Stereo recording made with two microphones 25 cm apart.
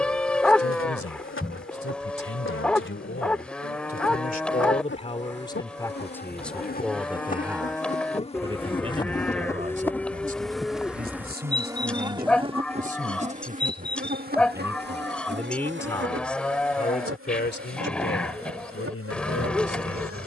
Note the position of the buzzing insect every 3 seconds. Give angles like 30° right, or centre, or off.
50° left, 50° left, 30° left, centre, 30° right, 50° right, 60° right.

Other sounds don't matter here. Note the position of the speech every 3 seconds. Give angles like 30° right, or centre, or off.
60° left, 30° left, 10° right, 30° right, 30° right, 30° left, 60° left.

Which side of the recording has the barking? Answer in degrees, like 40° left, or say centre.
centre.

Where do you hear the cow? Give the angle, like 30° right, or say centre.
centre.